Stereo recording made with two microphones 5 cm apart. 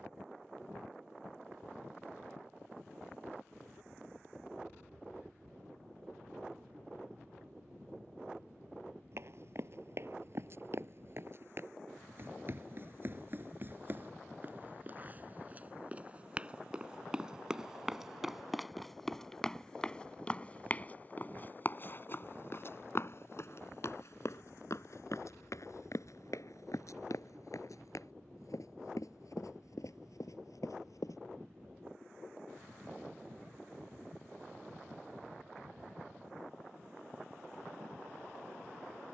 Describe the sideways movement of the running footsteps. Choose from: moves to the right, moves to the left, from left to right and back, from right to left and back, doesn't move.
moves to the left.